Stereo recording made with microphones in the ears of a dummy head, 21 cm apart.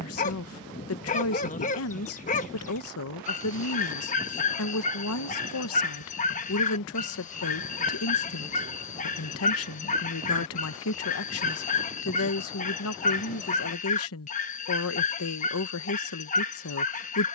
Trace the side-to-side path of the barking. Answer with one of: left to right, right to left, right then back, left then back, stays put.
stays put.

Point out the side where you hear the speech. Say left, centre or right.
left.